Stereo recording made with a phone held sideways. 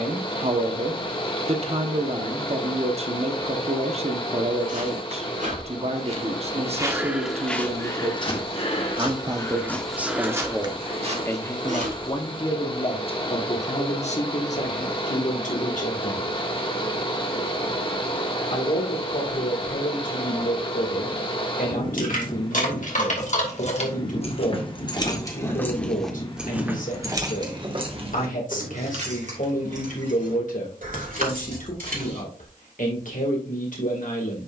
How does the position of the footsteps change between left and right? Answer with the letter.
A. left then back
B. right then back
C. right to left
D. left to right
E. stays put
A.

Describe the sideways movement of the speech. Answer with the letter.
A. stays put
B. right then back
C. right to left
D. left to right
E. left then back
C.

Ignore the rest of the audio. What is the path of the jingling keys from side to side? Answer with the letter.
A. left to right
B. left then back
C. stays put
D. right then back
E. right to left
A.